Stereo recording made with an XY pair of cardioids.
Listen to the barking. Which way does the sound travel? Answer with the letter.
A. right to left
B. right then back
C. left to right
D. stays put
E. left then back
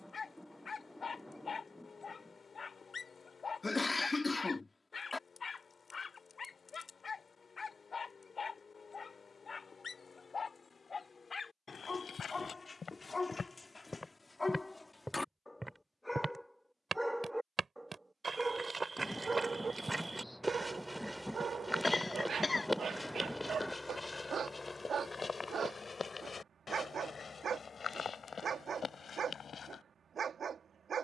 C.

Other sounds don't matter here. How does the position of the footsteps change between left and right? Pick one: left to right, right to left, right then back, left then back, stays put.
right then back.